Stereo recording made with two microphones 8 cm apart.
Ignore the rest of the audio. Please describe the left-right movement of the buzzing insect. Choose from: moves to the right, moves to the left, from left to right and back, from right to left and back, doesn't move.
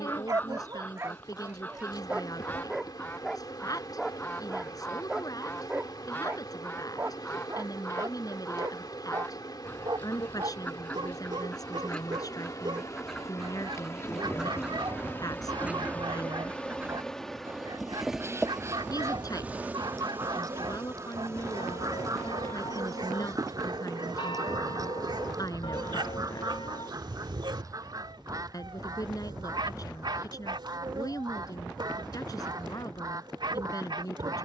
moves to the right.